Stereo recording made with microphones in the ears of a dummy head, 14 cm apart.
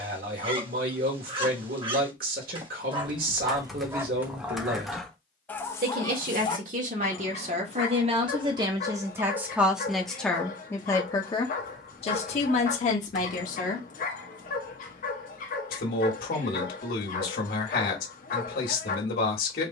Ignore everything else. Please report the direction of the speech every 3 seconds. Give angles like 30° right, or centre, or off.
60° right, 60° right, 40° right, 10° left, 50° left, 60° left, 60° left.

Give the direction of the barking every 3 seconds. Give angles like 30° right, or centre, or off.
30° right, 10° right, 40° left, 60° left, 60° left, 60° left, 60° left.